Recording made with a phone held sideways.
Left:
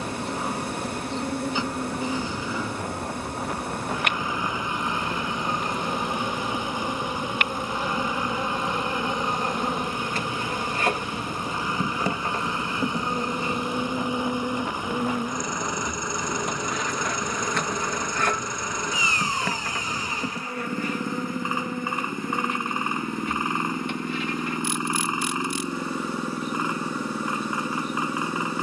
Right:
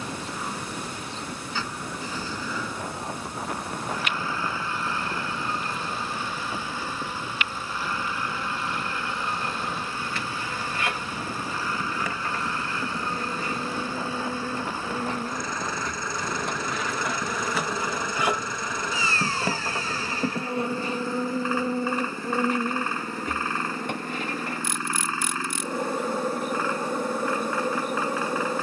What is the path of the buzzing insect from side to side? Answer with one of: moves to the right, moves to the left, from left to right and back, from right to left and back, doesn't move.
moves to the right.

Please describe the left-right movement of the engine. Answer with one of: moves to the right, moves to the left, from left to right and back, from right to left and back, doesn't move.
doesn't move.